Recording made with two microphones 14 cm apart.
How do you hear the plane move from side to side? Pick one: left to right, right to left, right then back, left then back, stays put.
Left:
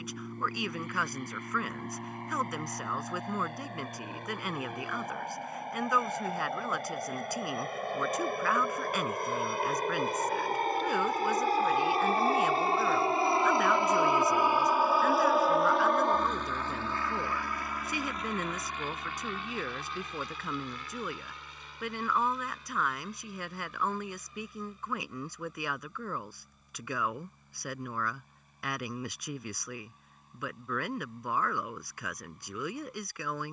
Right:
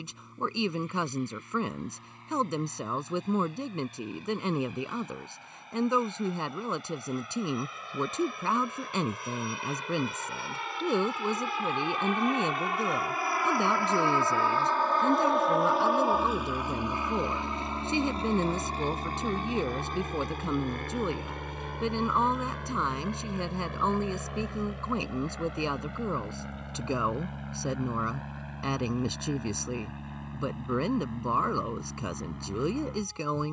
left to right.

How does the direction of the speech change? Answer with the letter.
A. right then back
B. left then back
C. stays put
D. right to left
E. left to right
C.